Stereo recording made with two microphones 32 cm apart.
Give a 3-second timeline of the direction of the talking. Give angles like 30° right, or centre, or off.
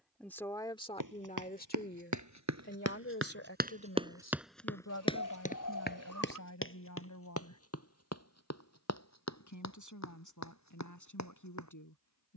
20° left, 50° left, 60° left, 70° left.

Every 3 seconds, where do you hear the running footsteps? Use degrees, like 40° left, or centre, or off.
60° right, centre, 40° left, 60° left.